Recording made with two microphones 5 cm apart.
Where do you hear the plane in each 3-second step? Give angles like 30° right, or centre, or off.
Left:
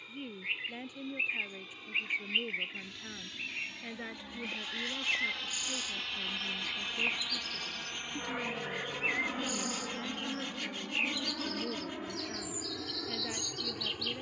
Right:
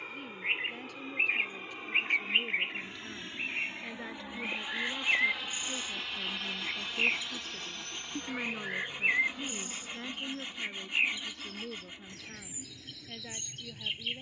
40° right, 20° right, 10° left, 40° left, 60° left.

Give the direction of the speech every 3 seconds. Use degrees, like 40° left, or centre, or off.
10° left, centre, 10° right, centre, 10° left.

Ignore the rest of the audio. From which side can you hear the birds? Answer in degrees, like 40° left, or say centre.
30° right.